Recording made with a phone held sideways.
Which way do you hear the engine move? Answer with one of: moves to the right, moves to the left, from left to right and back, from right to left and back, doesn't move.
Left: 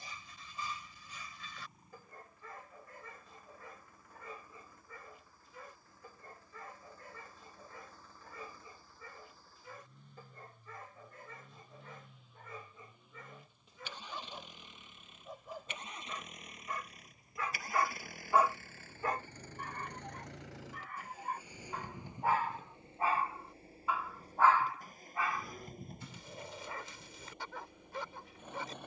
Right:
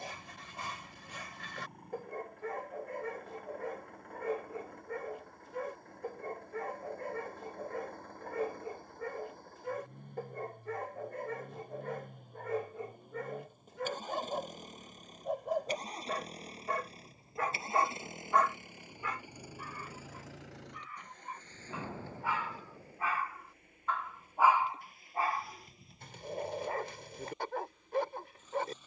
moves to the left.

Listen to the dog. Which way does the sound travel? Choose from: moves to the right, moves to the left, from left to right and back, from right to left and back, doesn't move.
from right to left and back.